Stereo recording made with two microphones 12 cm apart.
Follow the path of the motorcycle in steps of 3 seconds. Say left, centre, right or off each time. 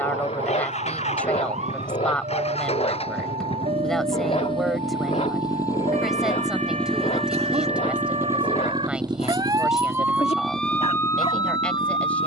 left, left, centre, right.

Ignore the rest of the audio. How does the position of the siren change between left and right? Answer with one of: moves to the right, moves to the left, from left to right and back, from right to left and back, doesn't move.
moves to the left.